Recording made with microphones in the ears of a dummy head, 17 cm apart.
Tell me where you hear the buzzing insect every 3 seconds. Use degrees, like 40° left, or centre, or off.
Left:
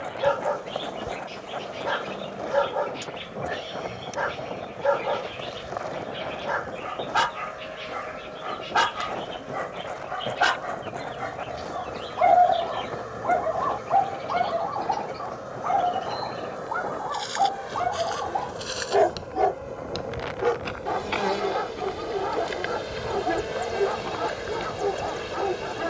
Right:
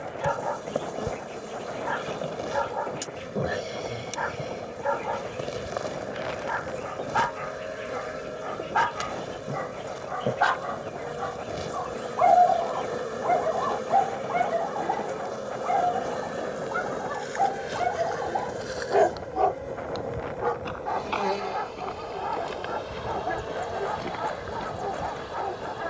40° right, 40° right, 40° right, 40° right, 40° right, 30° right, 10° right, 20° left, 30° left.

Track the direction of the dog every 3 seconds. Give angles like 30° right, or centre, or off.
50° left, 50° left, 50° left, 30° left, centre, 20° right, 10° left, 40° left, 40° left.